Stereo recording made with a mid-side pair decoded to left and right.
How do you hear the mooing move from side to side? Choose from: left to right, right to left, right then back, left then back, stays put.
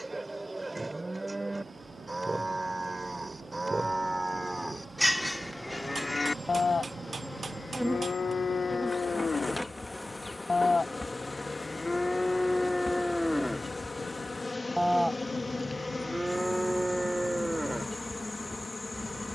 left then back.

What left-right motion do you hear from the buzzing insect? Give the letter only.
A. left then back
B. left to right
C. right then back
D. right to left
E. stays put
D.